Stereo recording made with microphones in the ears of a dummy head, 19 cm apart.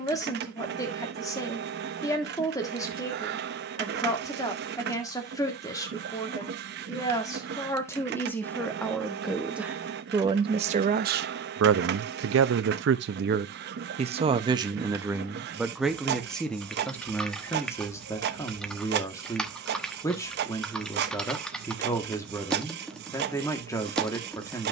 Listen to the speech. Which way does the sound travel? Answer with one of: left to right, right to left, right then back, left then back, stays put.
right then back.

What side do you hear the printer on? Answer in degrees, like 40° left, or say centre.
50° right.